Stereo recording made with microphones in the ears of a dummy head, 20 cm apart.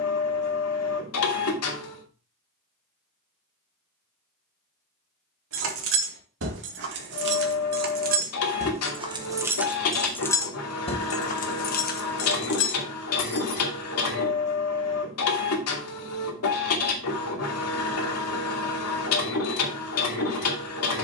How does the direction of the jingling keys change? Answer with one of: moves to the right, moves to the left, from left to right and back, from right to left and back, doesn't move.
moves to the left.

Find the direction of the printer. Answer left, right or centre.
left.